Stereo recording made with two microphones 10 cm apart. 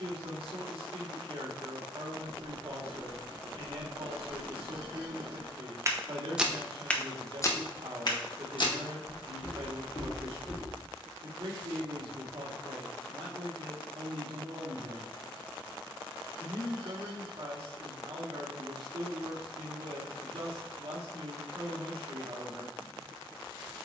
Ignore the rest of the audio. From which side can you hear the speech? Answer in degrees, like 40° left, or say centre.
60° right.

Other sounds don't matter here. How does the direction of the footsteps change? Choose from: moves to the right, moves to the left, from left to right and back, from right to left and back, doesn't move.
moves to the left.